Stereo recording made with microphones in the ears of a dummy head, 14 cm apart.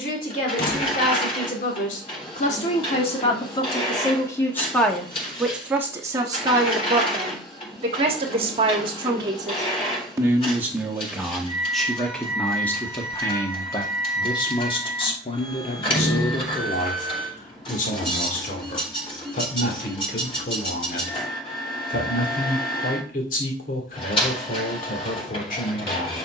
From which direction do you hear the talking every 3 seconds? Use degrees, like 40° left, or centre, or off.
50° left, 10° left, 30° right, 10° right, 20° left, 40° left, 50° left, 50° left, 50° left.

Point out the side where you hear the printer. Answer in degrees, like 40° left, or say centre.
40° left.